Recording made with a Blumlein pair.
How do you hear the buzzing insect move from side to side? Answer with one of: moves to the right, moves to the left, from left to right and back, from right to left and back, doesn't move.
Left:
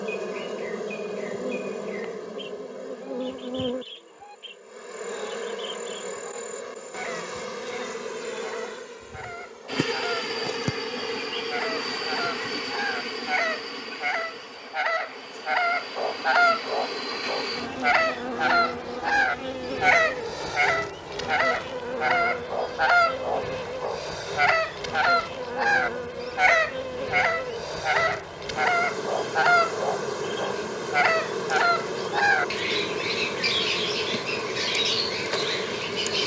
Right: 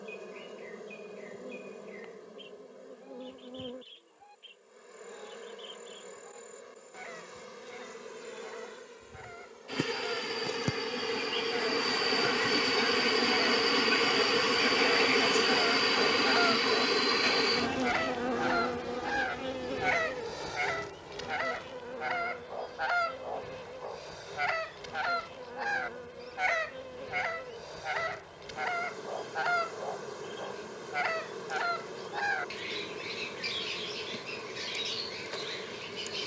from left to right and back.